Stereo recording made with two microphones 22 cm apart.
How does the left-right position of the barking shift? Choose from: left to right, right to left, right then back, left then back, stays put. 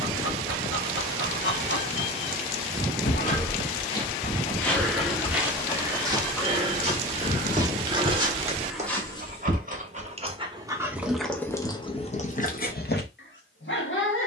right then back.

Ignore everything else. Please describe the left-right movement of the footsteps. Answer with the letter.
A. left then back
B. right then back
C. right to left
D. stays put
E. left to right
B.